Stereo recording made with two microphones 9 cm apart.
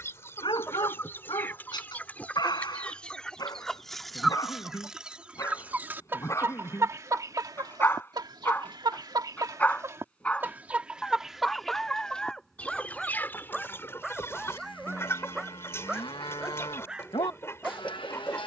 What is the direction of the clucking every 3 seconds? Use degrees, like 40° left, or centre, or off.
20° left, centre, 40° right, 20° right, 20° left, 30° left.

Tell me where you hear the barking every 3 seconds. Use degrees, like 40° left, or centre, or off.
50° left, 40° left, 20° left, 10° left, centre, 10° right.